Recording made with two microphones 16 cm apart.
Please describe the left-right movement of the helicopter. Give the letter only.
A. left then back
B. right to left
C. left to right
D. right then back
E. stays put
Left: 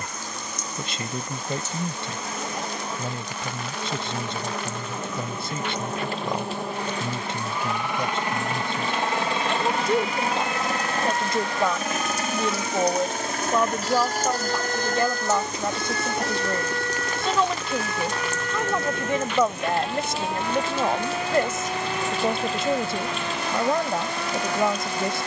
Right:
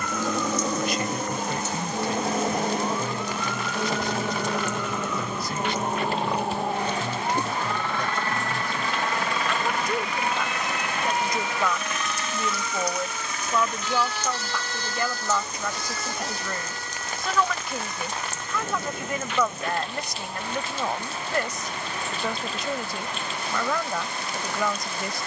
B.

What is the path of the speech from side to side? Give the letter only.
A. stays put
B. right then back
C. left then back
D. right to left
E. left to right
A.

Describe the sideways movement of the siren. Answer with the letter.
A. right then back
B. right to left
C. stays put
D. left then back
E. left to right
B.